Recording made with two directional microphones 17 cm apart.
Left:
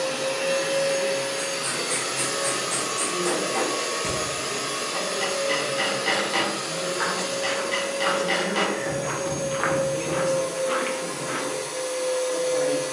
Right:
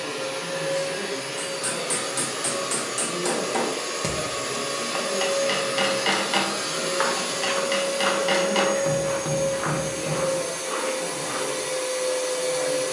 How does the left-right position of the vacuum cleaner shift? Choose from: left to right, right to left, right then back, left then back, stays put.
left to right.